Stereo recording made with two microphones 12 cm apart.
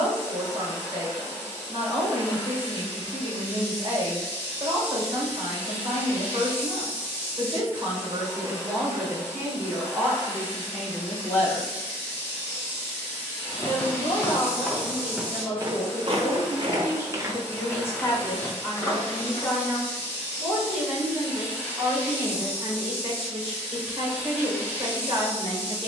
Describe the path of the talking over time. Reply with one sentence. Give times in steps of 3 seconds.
You can hear the talking on the right from 0 s, in the centre from 9 s, on the left from 12 s, in the centre from 18 s and on the right from 21 s.